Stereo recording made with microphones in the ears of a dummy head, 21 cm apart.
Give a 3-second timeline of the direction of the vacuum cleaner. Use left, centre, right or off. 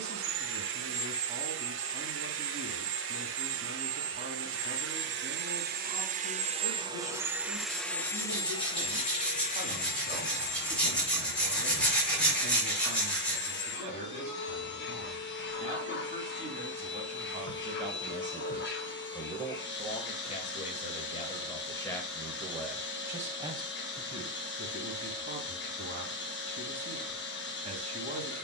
right, right, centre, left, left, left, left, left, left, left.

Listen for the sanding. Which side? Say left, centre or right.
centre.